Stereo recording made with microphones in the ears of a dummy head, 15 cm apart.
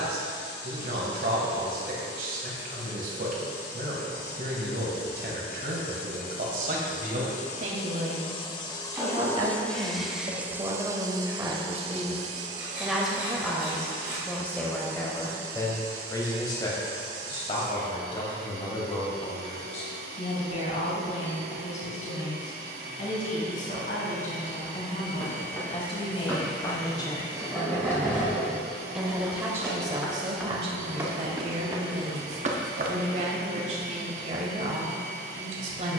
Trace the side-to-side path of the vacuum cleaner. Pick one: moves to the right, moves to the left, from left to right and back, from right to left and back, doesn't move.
moves to the right.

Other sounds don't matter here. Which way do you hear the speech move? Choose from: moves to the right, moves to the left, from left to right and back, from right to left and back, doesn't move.
from right to left and back.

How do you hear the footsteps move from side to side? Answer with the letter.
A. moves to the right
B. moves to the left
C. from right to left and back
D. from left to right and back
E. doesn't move
A.